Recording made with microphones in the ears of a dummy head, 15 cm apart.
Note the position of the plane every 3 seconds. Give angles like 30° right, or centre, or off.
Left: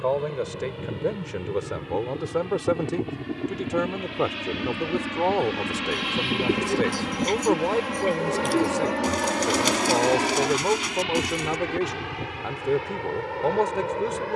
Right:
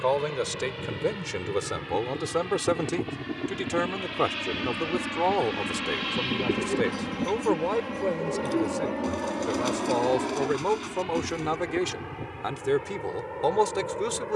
40° right, 20° right, 20° left, 50° left, 70° left.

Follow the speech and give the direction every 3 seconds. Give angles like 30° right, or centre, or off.
60° right, 30° right, centre, 20° right, 60° right.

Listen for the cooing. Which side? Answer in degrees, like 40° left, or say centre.
50° left.